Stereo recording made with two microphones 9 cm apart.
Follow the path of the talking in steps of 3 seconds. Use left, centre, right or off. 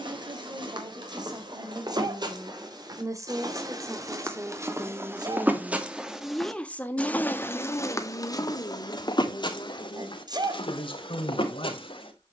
right, right, left, left.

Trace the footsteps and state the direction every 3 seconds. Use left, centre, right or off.
right, right, left, left.